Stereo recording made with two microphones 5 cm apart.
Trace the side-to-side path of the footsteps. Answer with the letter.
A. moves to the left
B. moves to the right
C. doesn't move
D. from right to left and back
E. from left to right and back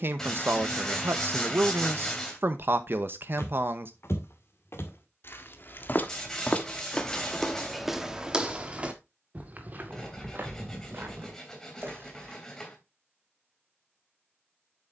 B.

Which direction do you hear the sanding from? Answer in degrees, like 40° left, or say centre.
10° left.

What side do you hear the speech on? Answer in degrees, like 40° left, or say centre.
50° right.